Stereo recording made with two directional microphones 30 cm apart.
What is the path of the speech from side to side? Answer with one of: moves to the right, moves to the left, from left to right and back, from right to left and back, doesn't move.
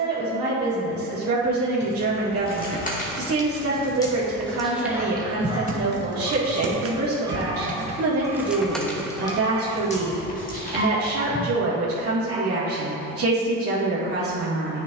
doesn't move.